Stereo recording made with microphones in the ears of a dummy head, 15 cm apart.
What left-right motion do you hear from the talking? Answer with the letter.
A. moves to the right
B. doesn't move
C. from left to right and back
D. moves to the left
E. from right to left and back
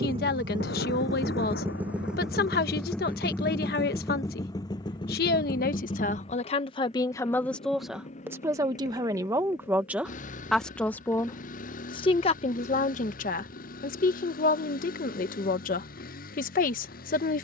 C.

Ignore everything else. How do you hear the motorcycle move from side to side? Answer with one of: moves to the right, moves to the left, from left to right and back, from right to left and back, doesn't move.
moves to the left.